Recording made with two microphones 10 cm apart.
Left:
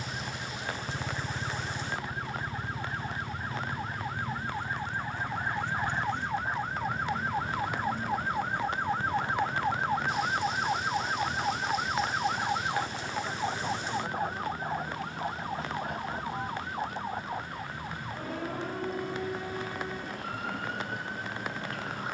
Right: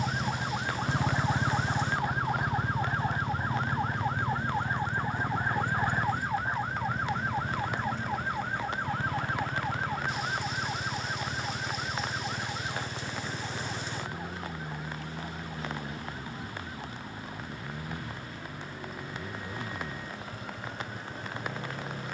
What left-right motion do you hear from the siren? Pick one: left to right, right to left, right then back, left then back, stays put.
right to left.